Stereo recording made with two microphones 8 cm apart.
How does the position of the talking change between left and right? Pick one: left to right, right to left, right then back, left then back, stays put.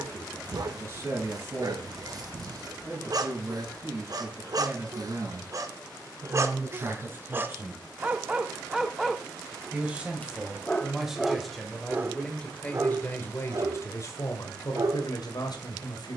right to left.